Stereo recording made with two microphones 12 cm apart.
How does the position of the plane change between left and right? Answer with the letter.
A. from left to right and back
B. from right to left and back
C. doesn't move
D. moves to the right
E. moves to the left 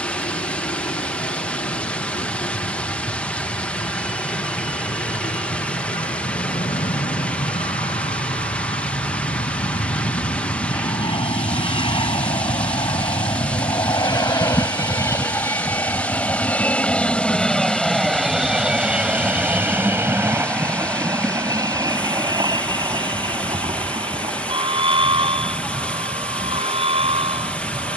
D.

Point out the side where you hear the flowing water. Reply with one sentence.
In this clip you hear the flowing water in the centre.